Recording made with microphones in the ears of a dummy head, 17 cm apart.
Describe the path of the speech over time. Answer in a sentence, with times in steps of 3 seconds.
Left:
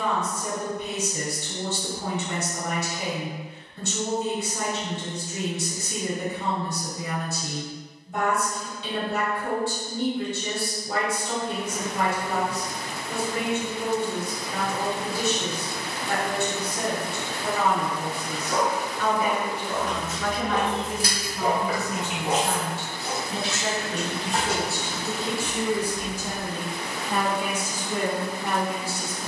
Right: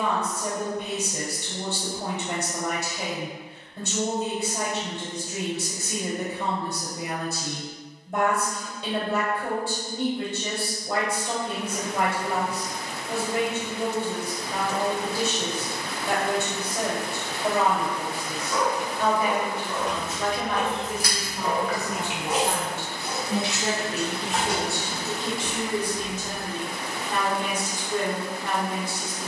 In this clip you hear the speech on the right from 0 s and in the centre from 24 s.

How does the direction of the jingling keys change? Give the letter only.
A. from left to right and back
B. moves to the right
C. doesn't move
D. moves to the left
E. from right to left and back
A.